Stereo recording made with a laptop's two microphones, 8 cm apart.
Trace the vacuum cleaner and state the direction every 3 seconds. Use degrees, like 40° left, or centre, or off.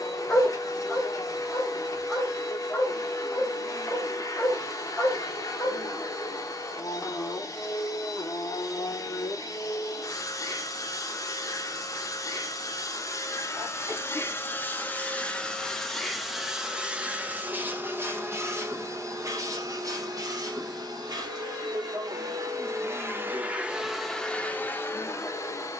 50° left, 50° left, 50° left, 50° left, 40° left, centre, 40° right, 40° right, 30° left.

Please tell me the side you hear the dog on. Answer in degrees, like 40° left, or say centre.
10° left.